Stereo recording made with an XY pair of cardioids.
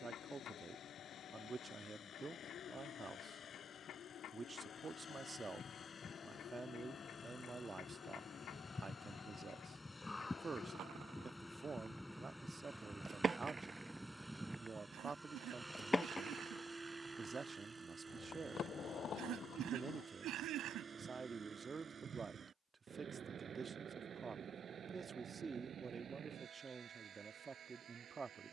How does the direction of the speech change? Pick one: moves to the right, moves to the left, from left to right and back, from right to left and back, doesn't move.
doesn't move.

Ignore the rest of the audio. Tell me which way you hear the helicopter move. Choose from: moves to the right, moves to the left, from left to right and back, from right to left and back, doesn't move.
moves to the right.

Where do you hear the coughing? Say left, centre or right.
right.